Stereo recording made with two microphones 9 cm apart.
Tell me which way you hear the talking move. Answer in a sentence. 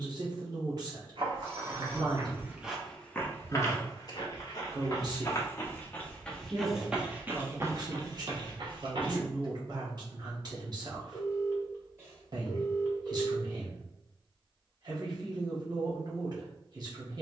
You can hear the talking stay in one place.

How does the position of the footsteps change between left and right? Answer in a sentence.
You can hear the footsteps go left and come back.